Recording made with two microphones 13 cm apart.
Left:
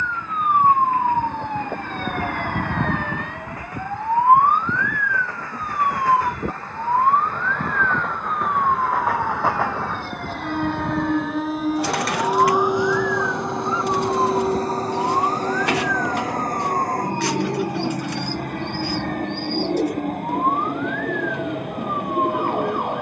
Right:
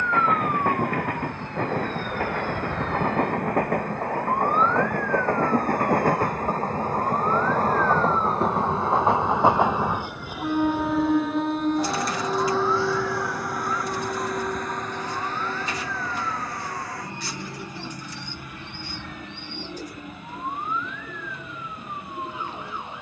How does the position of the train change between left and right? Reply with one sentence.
In this clip you hear the train move from right to left.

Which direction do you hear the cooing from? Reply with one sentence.
In this clip you hear the cooing on the left.